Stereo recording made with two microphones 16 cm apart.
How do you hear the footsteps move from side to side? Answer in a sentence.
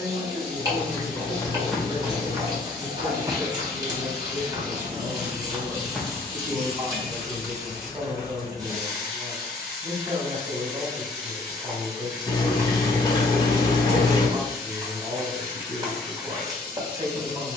You can hear the footsteps move from left to right and back again.